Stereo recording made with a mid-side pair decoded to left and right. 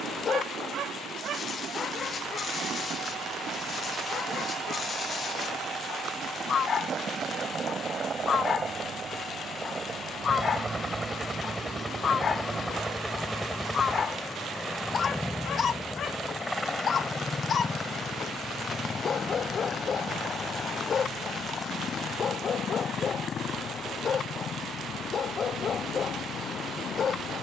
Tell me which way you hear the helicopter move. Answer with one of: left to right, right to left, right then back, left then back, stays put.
right to left.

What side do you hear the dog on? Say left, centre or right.
left.